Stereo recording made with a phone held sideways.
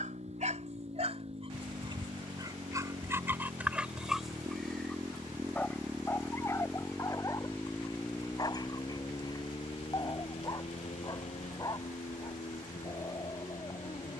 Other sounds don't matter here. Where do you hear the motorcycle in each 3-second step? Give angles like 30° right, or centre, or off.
50° right, 30° right, 10° left, 50° left, 70° left.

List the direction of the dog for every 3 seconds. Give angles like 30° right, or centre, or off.
40° right, centre, 20° left, 30° left, 30° left.